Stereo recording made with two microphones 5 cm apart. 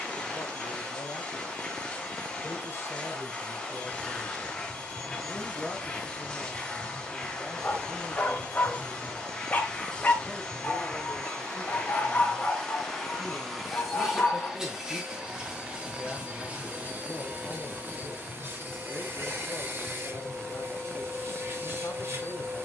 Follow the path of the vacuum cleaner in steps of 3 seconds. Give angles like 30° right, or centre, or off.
20° left, 20° left, 20° left, 20° left, centre, 30° right, 50° right, 50° right.